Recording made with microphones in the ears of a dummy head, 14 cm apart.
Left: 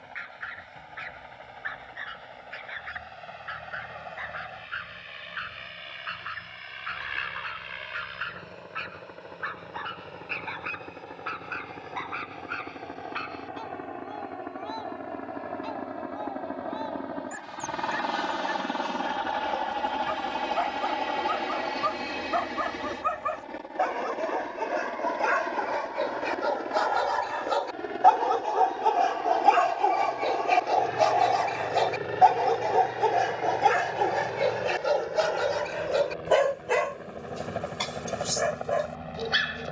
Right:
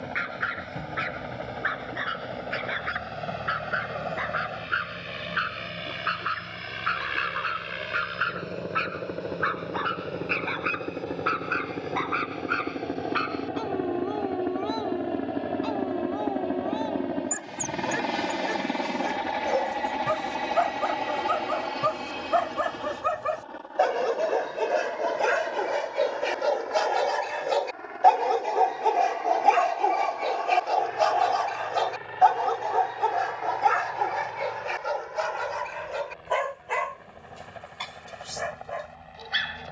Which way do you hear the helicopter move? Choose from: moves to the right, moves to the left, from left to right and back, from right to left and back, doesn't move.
moves to the left.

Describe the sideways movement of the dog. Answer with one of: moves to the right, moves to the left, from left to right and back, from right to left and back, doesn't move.
moves to the left.